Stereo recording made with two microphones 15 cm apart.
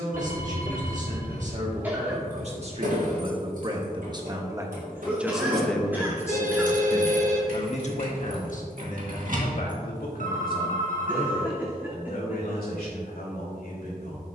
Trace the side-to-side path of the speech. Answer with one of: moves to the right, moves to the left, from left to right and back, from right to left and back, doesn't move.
moves to the left.